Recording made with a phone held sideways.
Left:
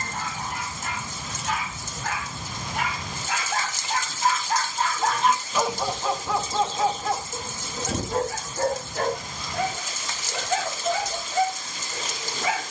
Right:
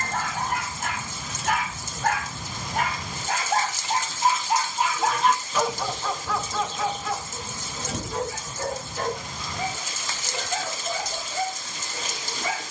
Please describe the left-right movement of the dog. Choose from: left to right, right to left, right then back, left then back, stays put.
right to left.